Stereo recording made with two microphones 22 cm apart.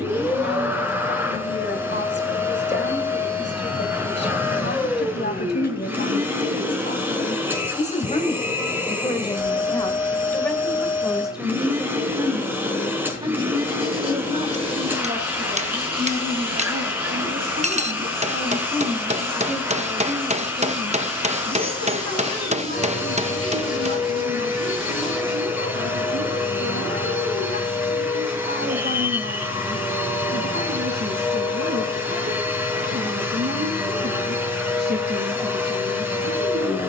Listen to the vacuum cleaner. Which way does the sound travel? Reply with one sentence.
You can hear the vacuum cleaner stay put.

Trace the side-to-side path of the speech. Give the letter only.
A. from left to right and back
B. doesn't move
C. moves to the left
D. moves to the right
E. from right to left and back
D.